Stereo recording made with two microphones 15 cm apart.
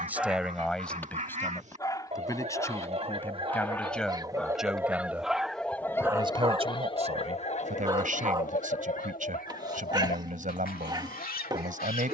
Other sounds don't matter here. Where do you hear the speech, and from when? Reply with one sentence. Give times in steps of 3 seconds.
In this clip you hear the speech in the centre from 0 s and on the right from 6 s.